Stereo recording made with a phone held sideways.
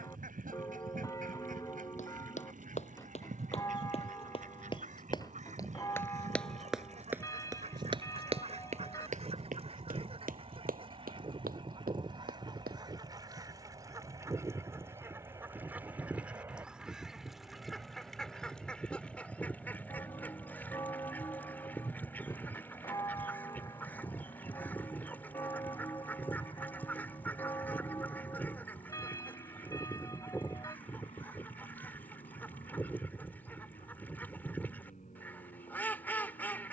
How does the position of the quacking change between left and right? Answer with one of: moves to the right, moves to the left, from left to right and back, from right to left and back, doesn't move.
moves to the left.